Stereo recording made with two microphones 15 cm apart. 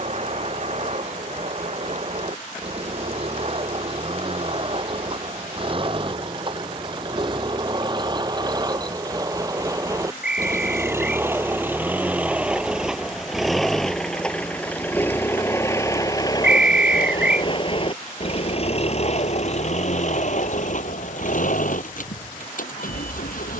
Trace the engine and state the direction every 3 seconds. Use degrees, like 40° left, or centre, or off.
50° right, 40° right, 30° right, 20° right, centre, 30° left, 50° left, 60° left.